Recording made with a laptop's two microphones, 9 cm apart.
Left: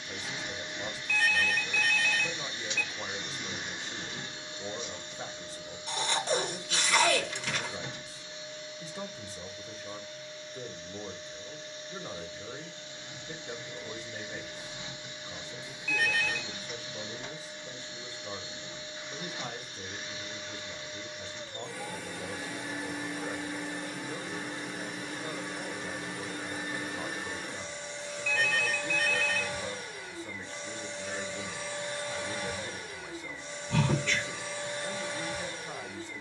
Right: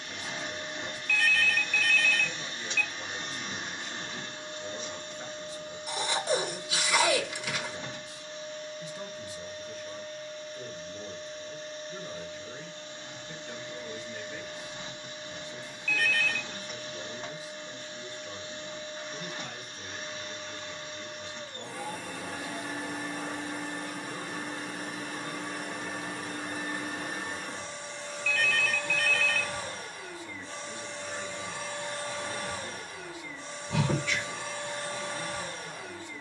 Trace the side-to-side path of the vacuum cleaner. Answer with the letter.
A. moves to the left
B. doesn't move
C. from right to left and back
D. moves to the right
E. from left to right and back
B.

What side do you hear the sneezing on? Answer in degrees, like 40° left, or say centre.
10° right.